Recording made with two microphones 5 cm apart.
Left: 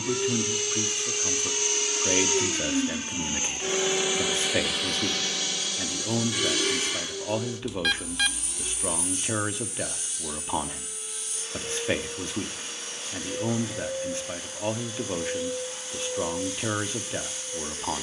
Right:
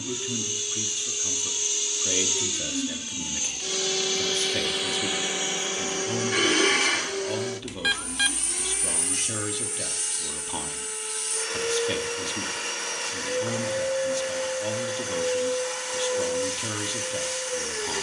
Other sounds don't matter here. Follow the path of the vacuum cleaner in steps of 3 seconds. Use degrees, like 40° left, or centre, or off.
50° left, centre, 60° right, 80° right, 80° right, 80° right.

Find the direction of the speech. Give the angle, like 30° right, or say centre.
30° left.